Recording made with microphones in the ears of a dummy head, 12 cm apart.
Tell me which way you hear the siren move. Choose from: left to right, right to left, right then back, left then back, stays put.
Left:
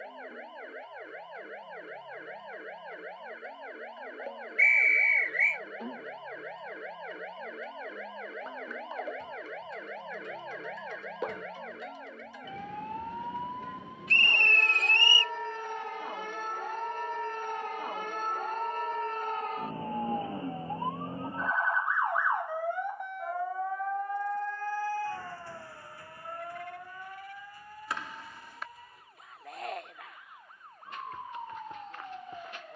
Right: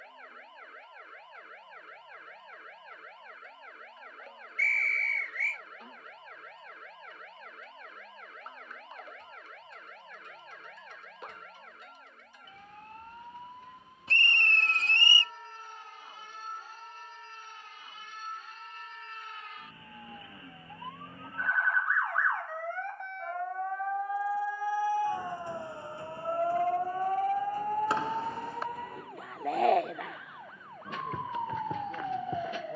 left to right.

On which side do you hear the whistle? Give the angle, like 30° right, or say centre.
30° right.